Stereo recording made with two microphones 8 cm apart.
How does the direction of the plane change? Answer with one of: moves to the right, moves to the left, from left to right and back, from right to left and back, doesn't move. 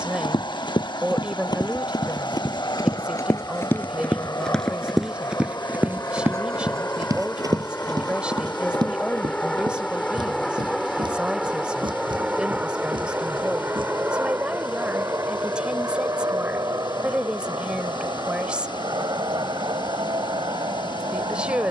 moves to the right.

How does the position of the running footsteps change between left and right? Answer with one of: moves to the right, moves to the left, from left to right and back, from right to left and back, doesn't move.
moves to the right.